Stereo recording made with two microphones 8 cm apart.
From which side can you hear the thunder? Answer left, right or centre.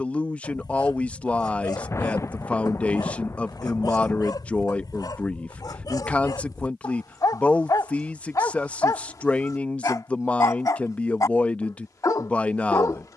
left.